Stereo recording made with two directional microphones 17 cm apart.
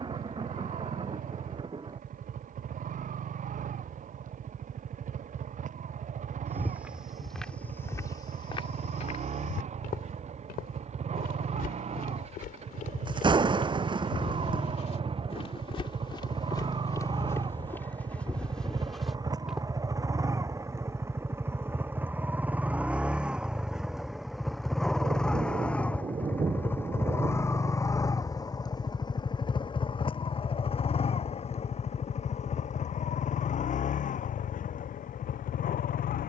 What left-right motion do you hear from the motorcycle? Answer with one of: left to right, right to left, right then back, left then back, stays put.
right to left.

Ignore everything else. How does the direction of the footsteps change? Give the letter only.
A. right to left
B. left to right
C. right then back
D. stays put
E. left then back
E.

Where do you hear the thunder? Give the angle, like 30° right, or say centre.
30° right.